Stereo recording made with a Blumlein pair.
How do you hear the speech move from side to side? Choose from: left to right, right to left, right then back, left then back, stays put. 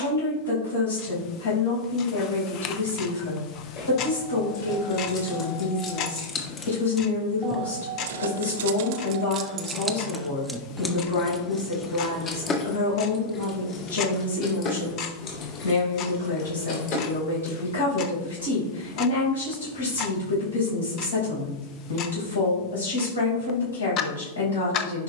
stays put.